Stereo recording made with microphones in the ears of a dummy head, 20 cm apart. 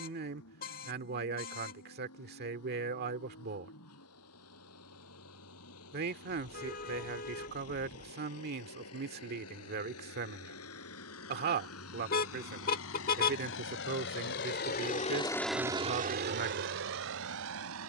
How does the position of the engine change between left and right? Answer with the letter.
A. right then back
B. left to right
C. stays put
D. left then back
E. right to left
B.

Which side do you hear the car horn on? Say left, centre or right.
left.